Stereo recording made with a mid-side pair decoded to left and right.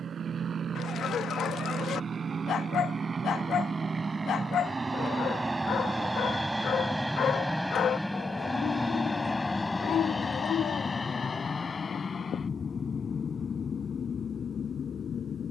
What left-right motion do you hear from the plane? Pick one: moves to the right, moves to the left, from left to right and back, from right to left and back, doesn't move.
moves to the left.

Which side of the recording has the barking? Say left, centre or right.
left.